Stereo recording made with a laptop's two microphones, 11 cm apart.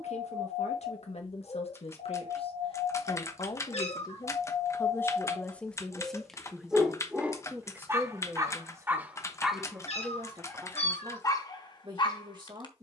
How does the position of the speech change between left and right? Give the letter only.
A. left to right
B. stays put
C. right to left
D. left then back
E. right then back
A.